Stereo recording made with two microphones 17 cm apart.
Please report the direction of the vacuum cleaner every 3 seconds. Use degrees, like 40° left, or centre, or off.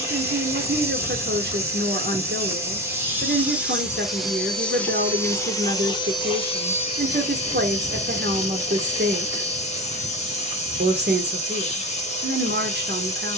10° right, centre, 40° left, 40° left, 40° left.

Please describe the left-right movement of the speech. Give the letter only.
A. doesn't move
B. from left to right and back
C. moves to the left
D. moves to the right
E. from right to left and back
A.